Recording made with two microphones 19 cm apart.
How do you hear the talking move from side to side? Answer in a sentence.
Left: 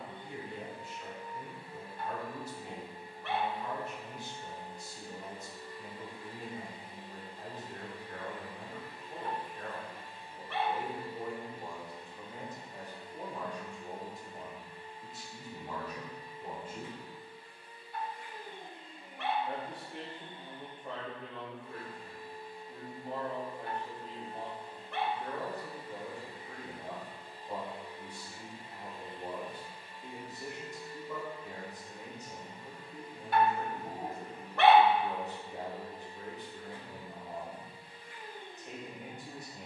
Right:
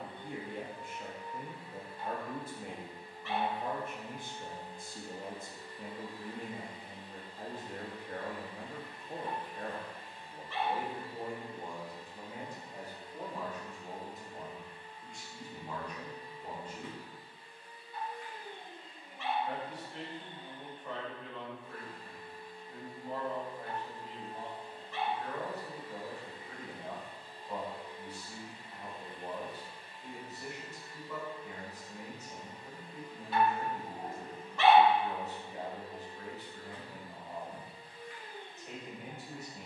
You can hear the talking go from the right side to the left.